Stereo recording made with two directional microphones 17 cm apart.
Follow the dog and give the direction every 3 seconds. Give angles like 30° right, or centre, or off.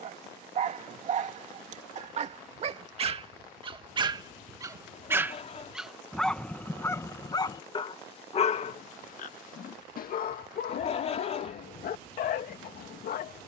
40° right, 20° right, 20° left, 60° left, 60° left.